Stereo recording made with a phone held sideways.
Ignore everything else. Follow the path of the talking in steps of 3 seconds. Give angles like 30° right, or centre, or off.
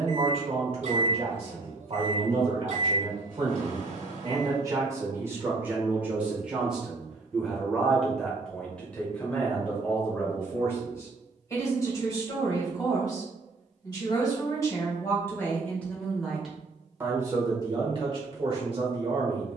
50° right, 30° right, centre, 20° left, 30° left, 10° right, 40° right.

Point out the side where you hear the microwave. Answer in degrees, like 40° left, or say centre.
70° right.